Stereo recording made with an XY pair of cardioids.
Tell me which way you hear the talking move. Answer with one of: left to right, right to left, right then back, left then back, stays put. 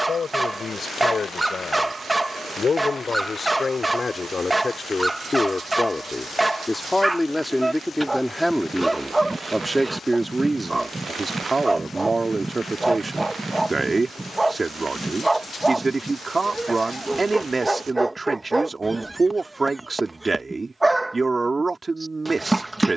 left to right.